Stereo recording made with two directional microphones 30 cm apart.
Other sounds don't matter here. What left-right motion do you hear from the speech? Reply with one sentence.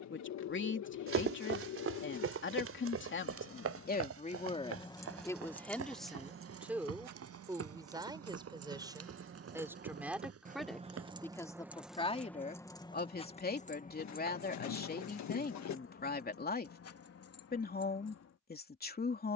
You can hear the speech go right and come back.